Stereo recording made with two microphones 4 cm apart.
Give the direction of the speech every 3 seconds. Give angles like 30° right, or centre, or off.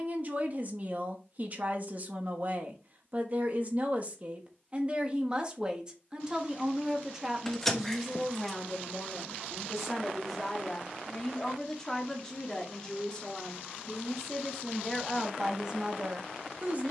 40° right, 30° right, 10° right, 10° left, 10° left, 20° right.